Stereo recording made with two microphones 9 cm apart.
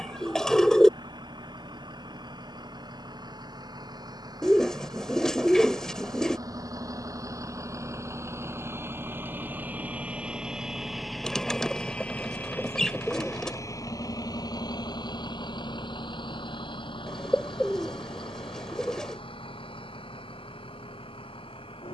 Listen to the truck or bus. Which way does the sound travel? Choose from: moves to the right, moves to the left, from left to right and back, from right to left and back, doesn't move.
moves to the left.